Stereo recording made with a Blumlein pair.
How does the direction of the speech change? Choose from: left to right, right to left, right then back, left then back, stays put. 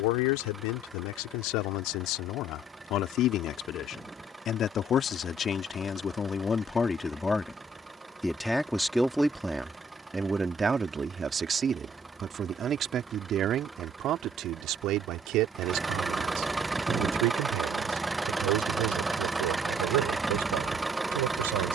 left to right.